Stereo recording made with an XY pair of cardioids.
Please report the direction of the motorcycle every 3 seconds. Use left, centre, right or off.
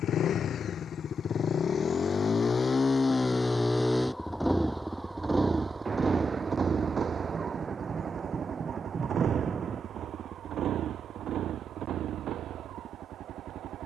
left, centre, right, right, right.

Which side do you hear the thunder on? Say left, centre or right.
right.